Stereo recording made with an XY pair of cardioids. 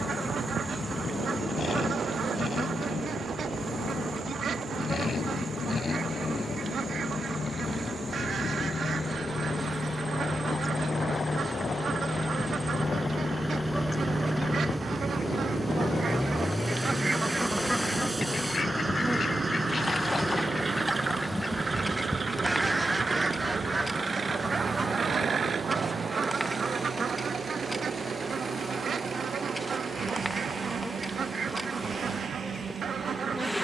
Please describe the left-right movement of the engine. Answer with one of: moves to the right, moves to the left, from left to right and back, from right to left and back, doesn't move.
moves to the right.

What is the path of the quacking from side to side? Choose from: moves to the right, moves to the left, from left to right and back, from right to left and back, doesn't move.
from right to left and back.